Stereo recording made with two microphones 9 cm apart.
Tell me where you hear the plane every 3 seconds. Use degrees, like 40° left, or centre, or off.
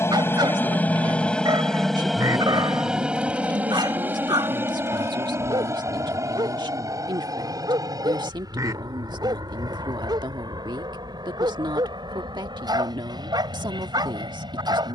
10° left, 20° right, 40° right, 40° right, 50° right.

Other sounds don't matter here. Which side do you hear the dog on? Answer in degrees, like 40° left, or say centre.
50° right.